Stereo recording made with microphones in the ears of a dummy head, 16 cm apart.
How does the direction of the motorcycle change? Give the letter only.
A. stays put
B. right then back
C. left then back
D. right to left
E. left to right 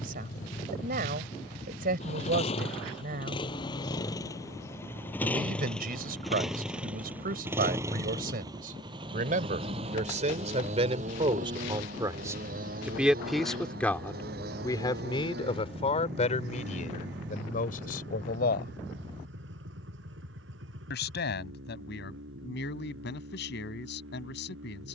E.